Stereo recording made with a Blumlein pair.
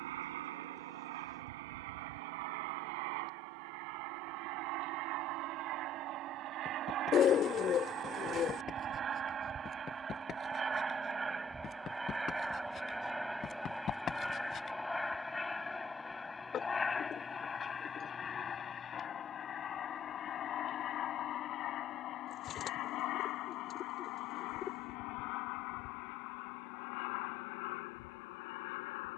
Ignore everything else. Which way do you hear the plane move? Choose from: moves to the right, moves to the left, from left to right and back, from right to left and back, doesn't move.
moves to the left.